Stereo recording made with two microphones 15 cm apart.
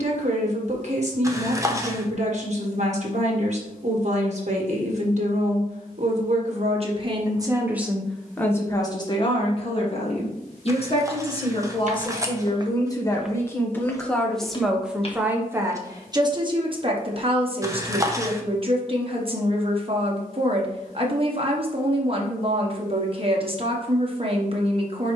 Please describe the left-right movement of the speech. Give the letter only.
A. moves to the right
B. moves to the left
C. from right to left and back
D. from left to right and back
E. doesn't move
C.